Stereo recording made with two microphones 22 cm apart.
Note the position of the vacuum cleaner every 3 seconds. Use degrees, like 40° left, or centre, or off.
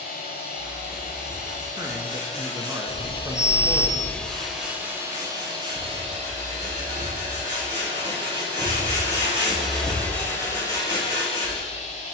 40° left, centre, 30° right, 20° left.